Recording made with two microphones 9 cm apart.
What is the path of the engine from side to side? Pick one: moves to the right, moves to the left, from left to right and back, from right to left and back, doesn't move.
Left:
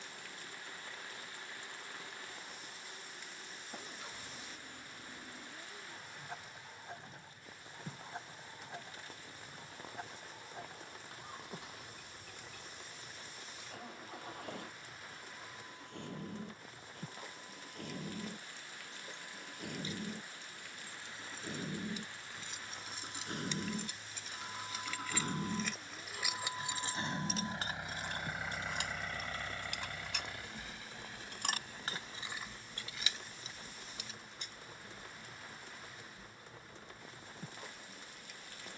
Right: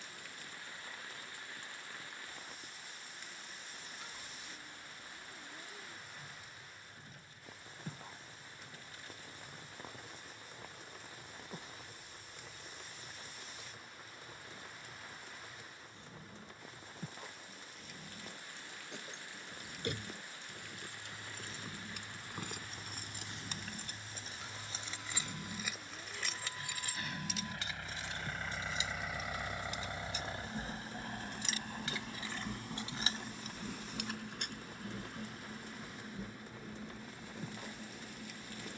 moves to the right.